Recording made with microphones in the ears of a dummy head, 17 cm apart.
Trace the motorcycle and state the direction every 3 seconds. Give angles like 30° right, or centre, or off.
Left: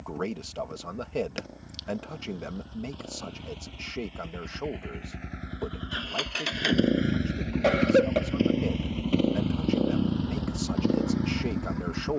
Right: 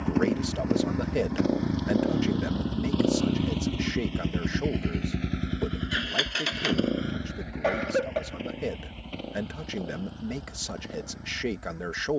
80° right, 50° right, 30° left, 60° left.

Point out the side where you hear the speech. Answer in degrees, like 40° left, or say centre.
10° right.